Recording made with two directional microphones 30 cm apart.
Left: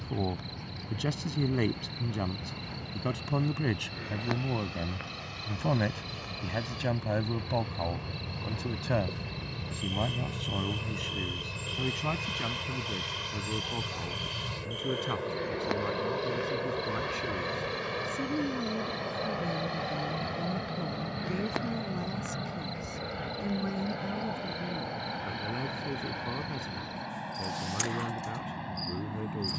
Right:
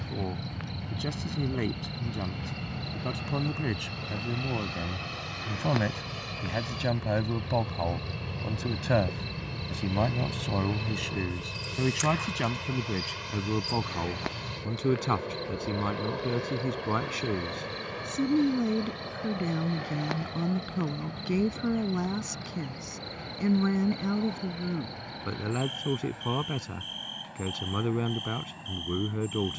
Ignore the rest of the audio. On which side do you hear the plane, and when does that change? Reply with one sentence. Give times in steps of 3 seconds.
In this clip you hear the plane on the right from 0 s, in the centre from 9 s and on the left from 15 s.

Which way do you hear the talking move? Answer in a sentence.
You can hear the talking move from left to right.